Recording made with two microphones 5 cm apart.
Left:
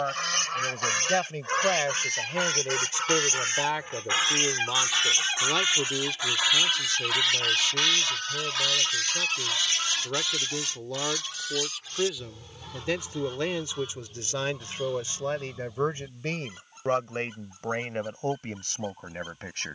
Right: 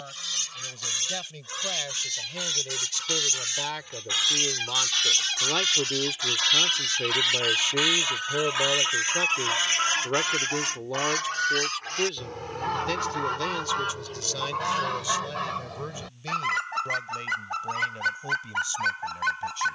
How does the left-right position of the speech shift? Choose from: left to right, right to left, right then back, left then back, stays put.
right then back.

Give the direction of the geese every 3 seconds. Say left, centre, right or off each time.
left, left, centre, right, right, right, right.